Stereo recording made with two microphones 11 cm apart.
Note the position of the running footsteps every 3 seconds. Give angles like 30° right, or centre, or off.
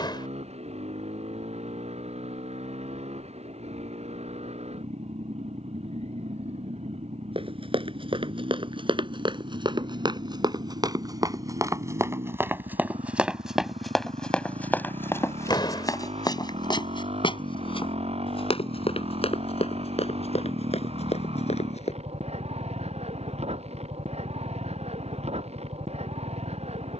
off, off, 50° right, 40° right, centre, 40° left, 60° left, 70° left, off.